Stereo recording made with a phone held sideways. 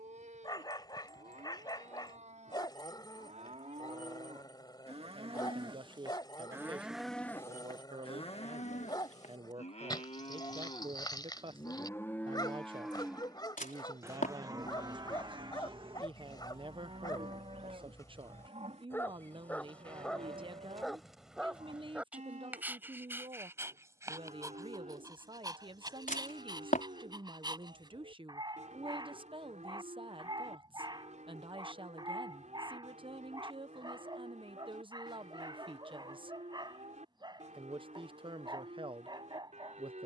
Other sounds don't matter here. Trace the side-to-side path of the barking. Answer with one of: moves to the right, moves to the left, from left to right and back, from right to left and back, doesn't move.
moves to the right.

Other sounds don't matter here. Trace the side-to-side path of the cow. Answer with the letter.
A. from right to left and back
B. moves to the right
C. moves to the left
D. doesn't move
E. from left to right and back
A.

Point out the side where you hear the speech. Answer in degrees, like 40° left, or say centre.
40° right.